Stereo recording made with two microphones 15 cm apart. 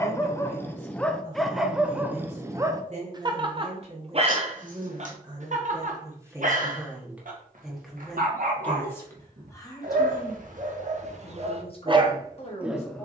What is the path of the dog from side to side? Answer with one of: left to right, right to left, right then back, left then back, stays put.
right then back.